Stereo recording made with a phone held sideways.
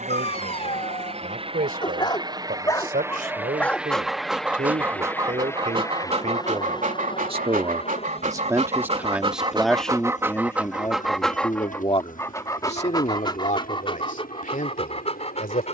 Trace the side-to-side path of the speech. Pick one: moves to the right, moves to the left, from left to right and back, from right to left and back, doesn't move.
moves to the left.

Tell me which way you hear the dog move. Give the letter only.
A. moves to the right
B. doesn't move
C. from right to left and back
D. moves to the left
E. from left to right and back
E.